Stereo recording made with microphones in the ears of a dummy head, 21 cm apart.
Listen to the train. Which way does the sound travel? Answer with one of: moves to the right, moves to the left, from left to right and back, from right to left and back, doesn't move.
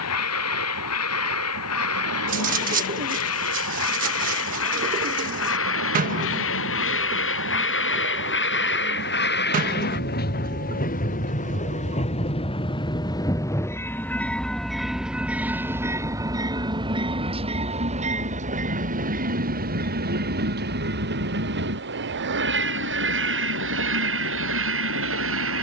moves to the right.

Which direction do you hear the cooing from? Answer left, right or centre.
right.